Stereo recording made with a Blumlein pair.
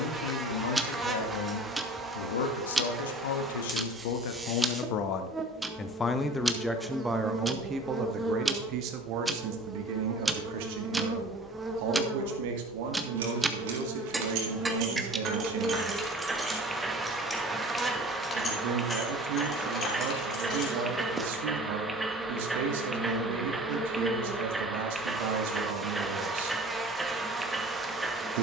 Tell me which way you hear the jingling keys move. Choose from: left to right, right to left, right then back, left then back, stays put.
right to left.